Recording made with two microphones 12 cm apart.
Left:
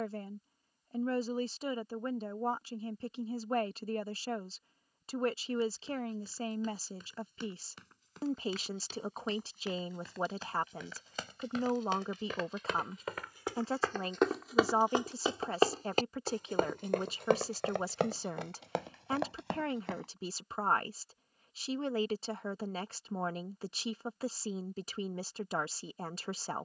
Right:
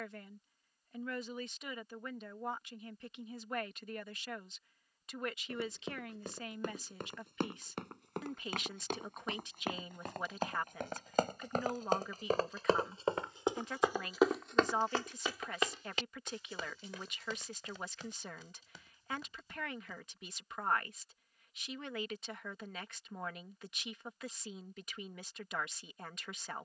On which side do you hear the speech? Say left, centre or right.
left.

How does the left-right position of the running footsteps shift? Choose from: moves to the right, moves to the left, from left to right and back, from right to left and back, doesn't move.
moves to the left.